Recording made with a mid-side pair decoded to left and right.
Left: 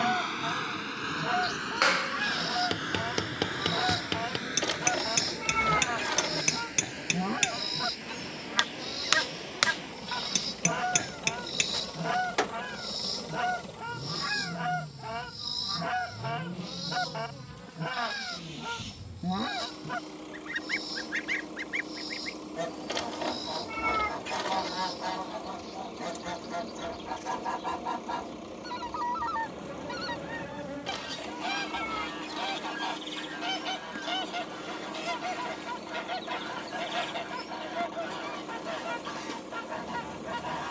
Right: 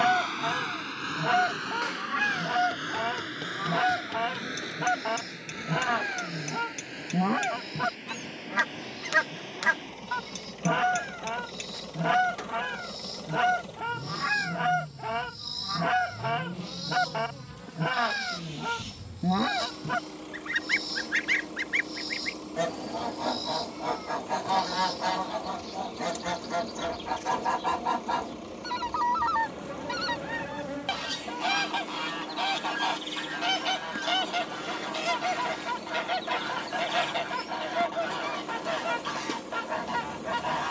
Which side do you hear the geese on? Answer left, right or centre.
right.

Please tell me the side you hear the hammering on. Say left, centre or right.
left.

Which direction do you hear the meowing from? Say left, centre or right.
left.